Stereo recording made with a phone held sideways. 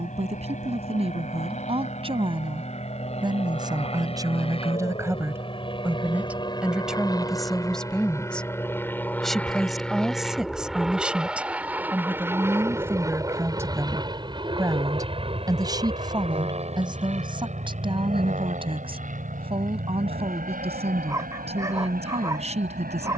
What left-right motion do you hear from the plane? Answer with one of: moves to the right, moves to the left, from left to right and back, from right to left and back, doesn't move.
moves to the right.